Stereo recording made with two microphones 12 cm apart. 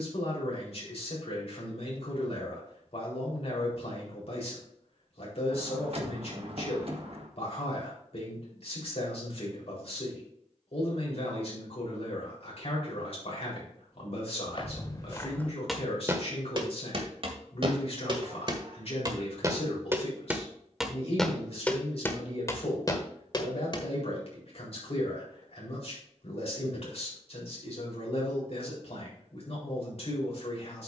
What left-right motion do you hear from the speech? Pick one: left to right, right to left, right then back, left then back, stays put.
stays put.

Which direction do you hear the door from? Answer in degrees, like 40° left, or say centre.
50° right.